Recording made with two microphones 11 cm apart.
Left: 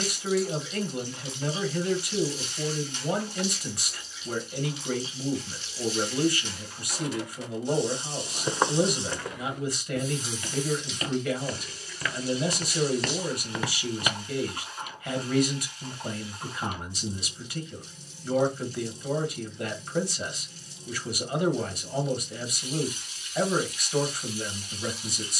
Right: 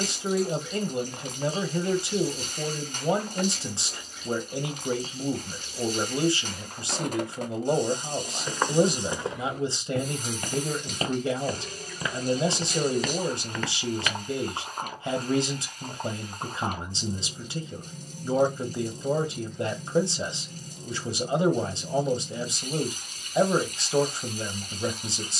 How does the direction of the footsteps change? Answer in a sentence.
You can hear the footsteps move from left to right and back again.